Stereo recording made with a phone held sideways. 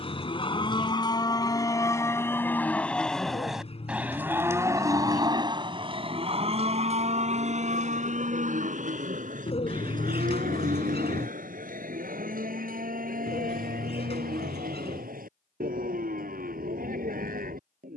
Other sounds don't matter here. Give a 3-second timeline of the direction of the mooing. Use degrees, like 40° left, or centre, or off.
20° left, 20° right, 50° right, 70° right, 80° right, 80° right.